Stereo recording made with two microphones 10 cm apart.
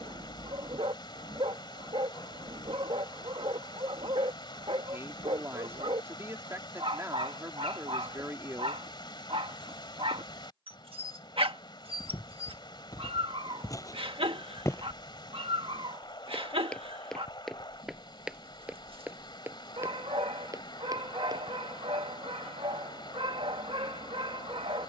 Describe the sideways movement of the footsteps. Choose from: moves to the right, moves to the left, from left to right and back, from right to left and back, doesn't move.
moves to the right.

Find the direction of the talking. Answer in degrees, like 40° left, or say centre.
30° right.